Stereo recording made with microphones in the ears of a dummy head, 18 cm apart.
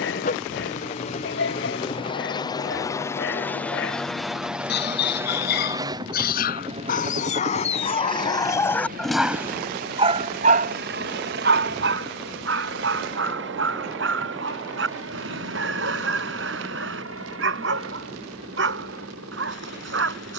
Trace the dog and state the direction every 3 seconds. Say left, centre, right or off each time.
left, left, left, right, right, right, right.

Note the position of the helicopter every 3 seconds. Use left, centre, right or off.
left, centre, right, right, right, right, right.